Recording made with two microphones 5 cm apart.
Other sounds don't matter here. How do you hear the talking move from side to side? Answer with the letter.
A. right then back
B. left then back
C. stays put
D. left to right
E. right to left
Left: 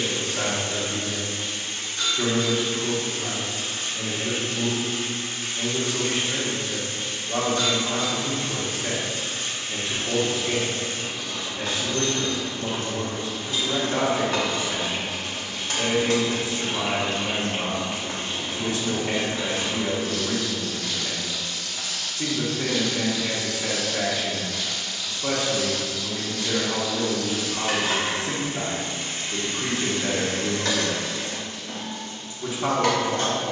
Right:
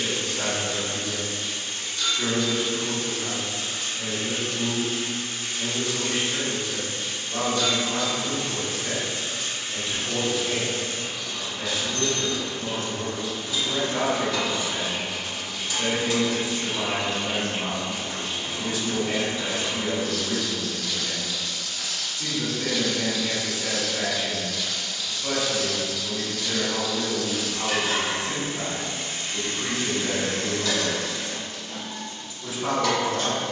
C.